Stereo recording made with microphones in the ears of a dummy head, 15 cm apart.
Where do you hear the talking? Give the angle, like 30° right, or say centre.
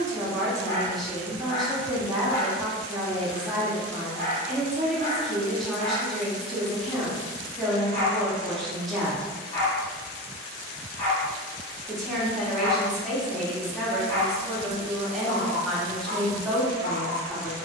centre.